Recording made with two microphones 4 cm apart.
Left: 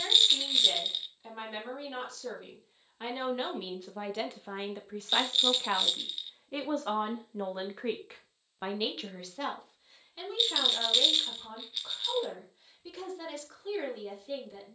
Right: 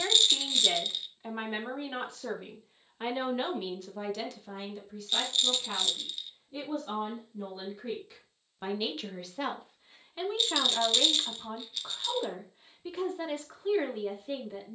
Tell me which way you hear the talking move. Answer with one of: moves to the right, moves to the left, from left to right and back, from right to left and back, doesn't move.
from right to left and back.